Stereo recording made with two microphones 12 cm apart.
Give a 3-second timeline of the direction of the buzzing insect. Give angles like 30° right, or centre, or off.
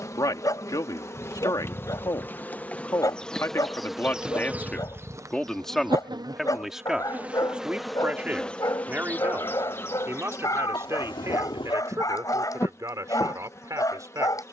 20° left, 10° right, 10° right, 20° left, 20° left.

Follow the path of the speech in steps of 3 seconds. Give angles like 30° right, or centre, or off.
30° left, 10° left, 10° right, 20° right, 30° right.